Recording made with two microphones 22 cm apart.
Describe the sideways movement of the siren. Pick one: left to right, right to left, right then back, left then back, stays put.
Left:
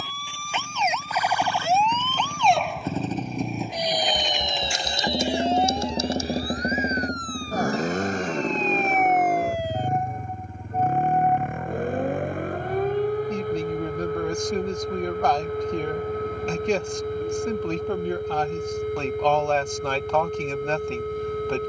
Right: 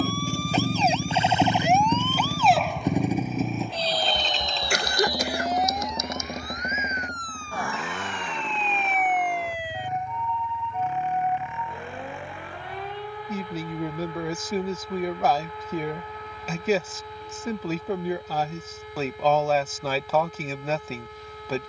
right to left.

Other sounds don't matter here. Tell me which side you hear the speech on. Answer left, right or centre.
centre.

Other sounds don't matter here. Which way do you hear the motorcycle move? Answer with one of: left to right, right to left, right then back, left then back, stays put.
right to left.